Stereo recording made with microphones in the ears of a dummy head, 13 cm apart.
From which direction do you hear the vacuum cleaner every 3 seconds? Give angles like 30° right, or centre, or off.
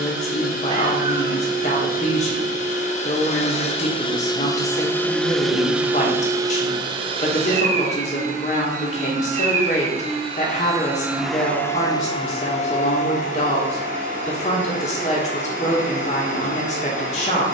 60° left, 20° left, 40° right, 20° right, 60° left, 60° left.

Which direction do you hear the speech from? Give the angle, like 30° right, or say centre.
50° left.